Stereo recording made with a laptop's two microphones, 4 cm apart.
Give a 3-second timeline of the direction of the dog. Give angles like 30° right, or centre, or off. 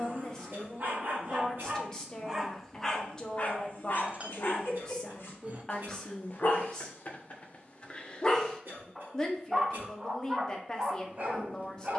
30° right, 50° left, 30° left, 30° right.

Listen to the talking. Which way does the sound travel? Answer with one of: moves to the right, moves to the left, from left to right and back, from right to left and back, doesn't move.
doesn't move.